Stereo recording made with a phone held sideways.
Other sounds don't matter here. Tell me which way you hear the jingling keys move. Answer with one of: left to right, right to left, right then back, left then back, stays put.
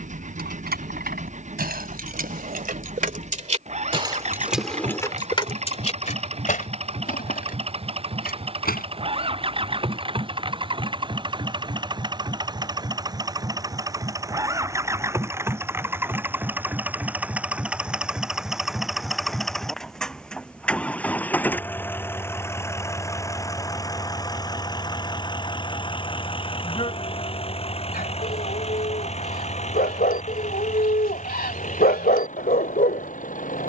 right to left.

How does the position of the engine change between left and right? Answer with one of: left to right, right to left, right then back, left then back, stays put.
right to left.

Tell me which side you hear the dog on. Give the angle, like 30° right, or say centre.
70° left.